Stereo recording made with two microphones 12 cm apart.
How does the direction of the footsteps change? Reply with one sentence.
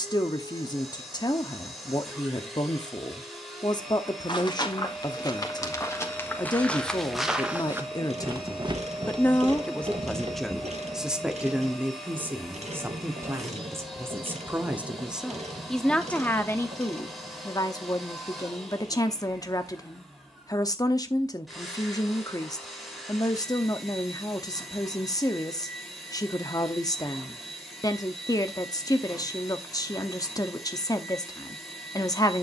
In this clip you hear the footsteps move from left to right.